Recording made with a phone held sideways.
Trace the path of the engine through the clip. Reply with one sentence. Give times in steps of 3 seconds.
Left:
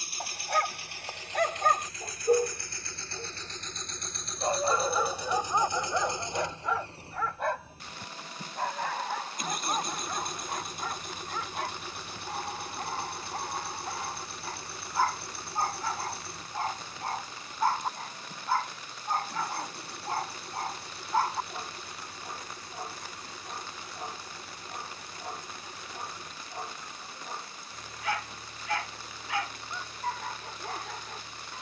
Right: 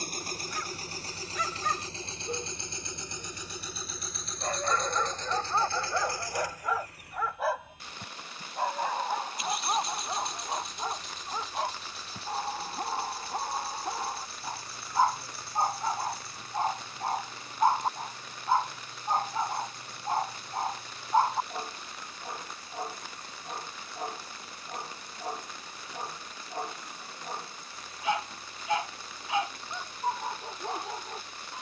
In this clip you hear the engine on the right from 0 s, in the centre from 3 s and on the left from 6 s.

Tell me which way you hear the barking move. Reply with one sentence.
In this clip you hear the barking travel towards the right.